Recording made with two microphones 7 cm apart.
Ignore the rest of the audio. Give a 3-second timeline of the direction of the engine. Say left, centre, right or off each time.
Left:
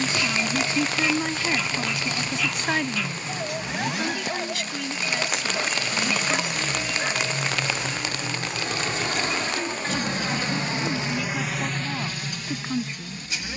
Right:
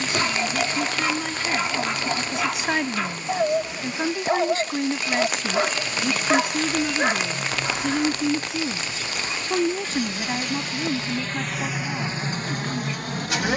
left, left, left, left, right.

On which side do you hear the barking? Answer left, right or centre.
right.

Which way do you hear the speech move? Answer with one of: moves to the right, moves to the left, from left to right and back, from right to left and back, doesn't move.
from left to right and back.